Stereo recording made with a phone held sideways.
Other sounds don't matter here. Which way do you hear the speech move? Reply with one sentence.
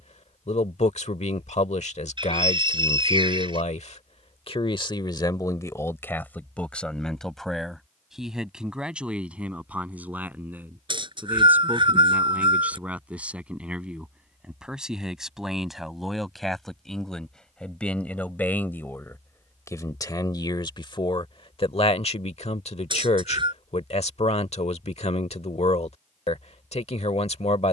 You can hear the speech move from left to right and back again.